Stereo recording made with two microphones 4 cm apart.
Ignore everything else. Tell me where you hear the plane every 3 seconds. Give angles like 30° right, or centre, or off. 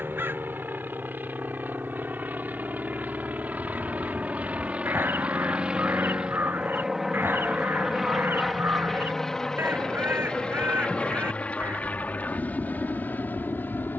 50° right, 30° right, 10° right, 20° left, 40° left.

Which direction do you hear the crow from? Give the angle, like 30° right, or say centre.
60° right.